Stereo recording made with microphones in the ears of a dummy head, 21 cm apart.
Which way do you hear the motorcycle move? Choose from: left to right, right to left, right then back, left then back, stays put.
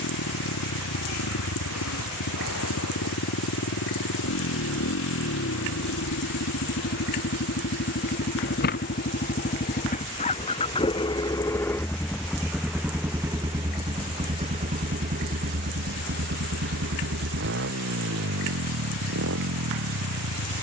left to right.